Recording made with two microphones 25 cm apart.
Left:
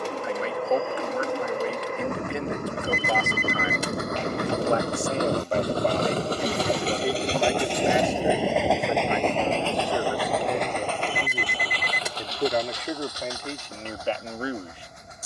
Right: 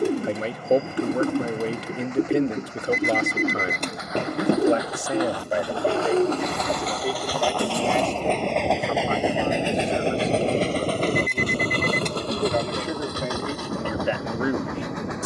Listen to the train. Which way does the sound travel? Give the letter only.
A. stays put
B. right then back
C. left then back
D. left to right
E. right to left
D.